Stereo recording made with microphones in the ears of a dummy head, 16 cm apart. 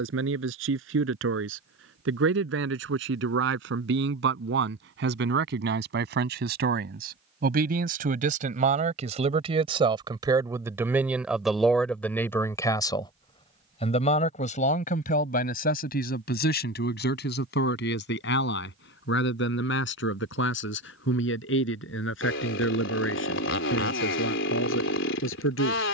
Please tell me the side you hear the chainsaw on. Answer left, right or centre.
left.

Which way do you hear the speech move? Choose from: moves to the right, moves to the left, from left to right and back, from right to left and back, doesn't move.
moves to the left.